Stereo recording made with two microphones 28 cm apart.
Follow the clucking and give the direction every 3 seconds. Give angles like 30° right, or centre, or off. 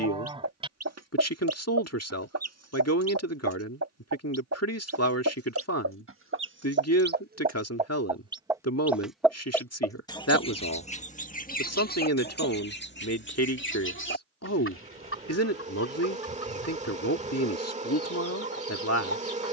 70° right, 60° right, 30° right, 20° left, 40° left, 50° left, 60° left.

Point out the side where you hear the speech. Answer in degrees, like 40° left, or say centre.
70° left.